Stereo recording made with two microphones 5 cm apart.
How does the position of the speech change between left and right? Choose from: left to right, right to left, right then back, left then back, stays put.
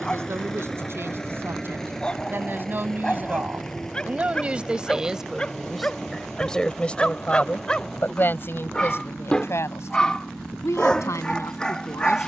right to left.